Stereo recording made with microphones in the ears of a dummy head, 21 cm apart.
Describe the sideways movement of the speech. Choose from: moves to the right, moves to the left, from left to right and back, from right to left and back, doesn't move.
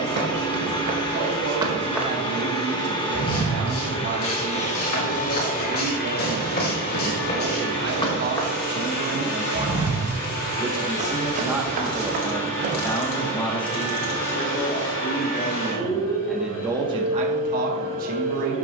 from right to left and back.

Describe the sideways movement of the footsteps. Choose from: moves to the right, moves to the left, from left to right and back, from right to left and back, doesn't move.
from right to left and back.